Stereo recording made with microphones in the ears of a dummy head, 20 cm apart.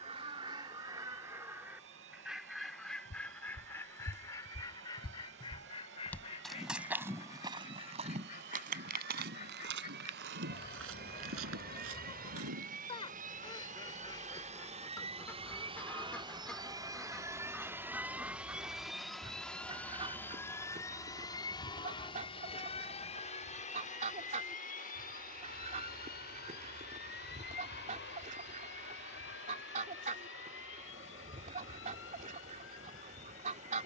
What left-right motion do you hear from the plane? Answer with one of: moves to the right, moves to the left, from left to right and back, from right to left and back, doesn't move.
moves to the left.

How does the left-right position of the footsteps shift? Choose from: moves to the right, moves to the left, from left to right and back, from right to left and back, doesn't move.
moves to the right.